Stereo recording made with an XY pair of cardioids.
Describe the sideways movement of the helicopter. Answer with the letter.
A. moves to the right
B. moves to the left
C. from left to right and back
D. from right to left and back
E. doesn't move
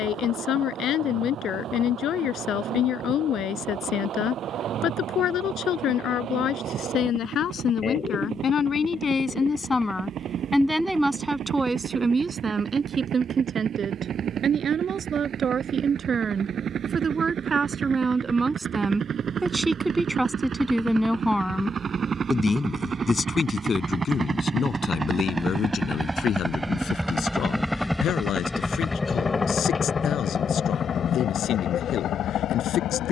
B.